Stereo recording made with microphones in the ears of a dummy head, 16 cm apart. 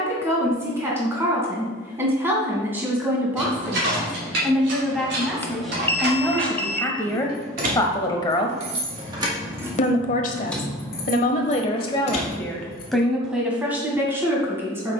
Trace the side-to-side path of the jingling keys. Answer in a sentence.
In this clip you hear the jingling keys go from the right side to the left.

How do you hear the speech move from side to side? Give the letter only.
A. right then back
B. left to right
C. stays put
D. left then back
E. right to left
D.